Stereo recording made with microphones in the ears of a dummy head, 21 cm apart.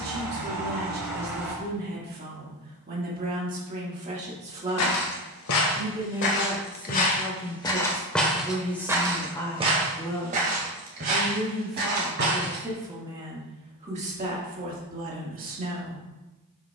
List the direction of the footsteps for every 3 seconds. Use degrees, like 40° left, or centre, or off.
off, 70° left, 20° left, 30° right, 50° right, off.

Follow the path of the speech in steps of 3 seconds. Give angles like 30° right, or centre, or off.
40° right, 30° right, centre, 10° left, 20° right, 40° right.